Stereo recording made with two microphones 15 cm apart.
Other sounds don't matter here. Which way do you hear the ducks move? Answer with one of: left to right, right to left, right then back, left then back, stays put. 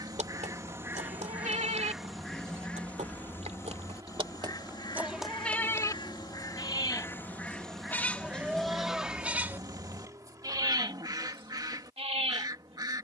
left then back.